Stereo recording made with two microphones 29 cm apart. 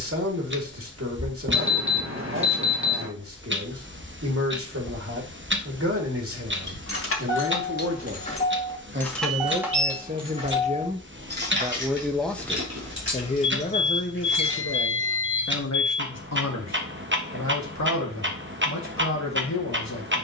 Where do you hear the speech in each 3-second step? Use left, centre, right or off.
right, right, right, right, left, left, left.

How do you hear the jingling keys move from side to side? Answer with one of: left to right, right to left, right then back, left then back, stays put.
left to right.